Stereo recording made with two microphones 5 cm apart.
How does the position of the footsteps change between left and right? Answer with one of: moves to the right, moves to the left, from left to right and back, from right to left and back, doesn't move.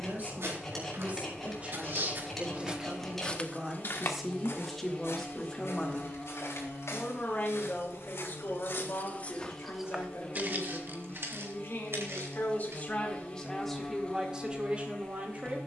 from right to left and back.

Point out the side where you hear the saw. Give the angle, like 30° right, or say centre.
10° left.